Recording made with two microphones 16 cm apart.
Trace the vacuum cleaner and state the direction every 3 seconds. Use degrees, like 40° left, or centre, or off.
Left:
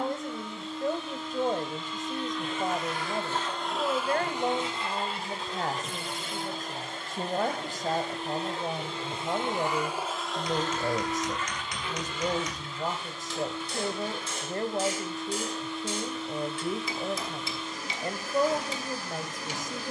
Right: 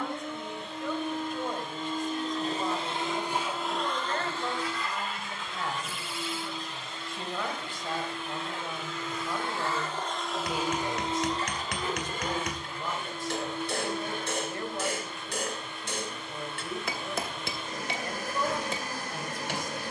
60° right, 20° left, 50° left, 10° right, 60° right, 70° right, 70° right.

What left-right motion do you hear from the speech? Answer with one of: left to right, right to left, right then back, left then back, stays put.
stays put.